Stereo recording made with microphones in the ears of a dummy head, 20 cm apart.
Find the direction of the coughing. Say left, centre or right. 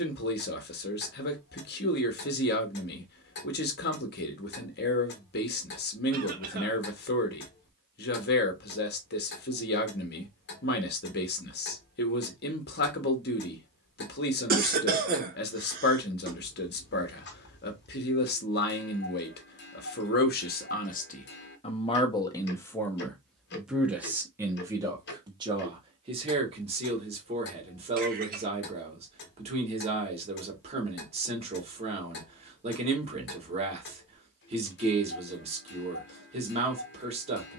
right.